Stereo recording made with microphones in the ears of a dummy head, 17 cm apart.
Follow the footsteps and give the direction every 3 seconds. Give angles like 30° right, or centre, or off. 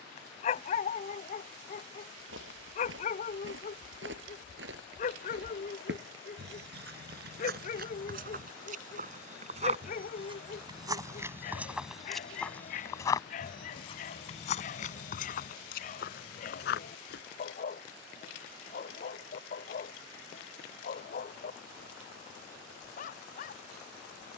70° right, 60° right, 50° right, 20° right, 20° left, 50° left, off, off.